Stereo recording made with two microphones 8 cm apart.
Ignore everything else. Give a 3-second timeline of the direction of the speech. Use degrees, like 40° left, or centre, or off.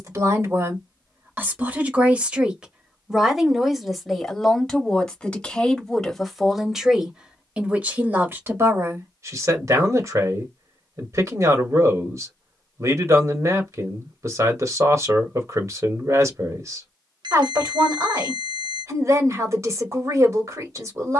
20° right, centre, 10° right, 40° right, 40° right, 40° right, 40° right.